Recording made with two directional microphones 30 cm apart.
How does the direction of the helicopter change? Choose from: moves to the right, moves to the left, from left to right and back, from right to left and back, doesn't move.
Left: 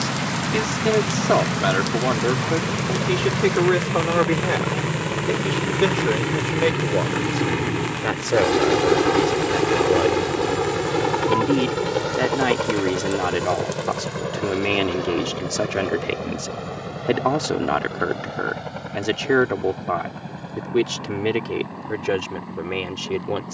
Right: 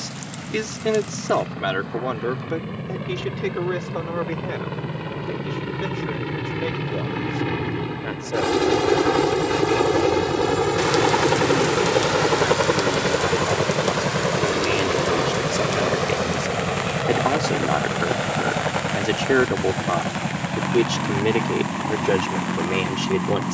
moves to the right.